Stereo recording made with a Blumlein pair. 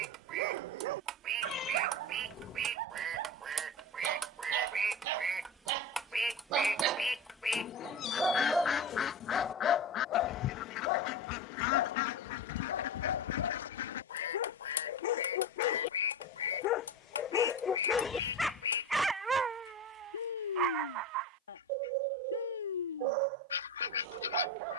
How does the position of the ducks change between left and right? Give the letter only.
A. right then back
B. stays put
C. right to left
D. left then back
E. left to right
C.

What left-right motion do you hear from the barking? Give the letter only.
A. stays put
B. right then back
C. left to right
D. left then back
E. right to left
D.